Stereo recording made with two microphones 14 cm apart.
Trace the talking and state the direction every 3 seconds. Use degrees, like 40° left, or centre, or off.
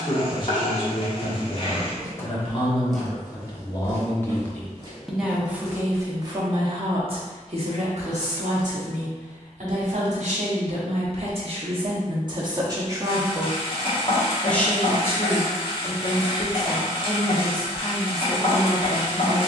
40° left, 10° left, 50° right, 50° right, 10° right, 30° left, 30° left.